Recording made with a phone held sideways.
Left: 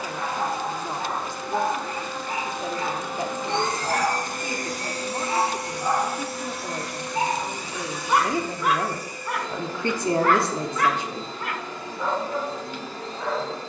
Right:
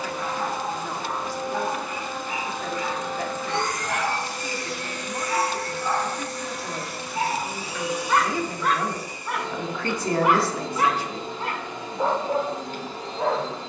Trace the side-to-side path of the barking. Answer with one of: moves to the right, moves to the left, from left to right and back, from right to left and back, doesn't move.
moves to the right.